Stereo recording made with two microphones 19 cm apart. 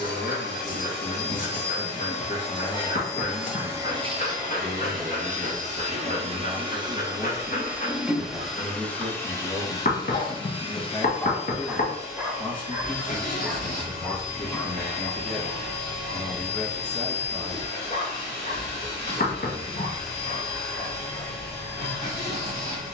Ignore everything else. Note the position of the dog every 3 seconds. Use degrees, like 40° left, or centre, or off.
50° left, 50° left, 50° left, 20° left, 10° right, 40° left, 40° left, 40° left.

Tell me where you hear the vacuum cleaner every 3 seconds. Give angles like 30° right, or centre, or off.
50° left, 30° right, 10° right, 30° left, 50° left, 60° left, 60° left, 60° left.